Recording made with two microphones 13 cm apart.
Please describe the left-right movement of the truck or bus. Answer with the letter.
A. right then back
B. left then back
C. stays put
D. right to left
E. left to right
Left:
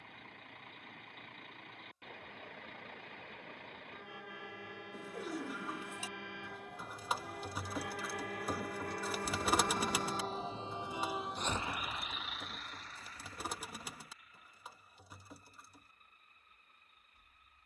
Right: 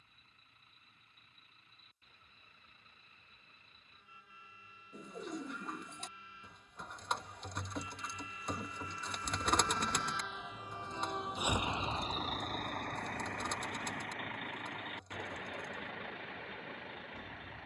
E.